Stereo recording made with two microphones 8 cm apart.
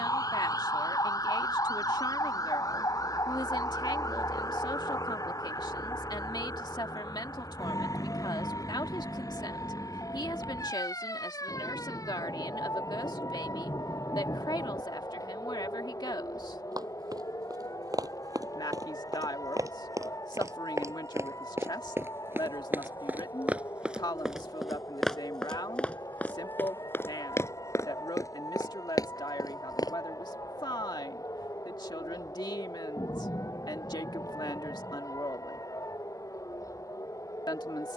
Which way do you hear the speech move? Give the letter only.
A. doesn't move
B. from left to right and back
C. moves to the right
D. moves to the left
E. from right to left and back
A.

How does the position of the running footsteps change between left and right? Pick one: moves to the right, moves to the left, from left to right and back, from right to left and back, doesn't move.
moves to the left.